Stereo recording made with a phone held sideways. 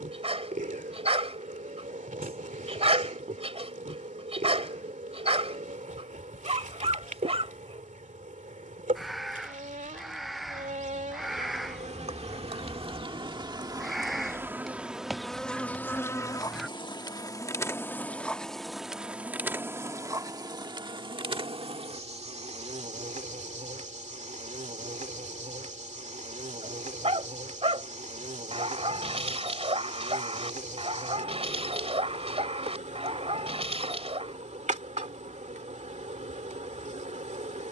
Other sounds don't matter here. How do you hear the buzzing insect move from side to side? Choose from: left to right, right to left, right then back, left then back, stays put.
left then back.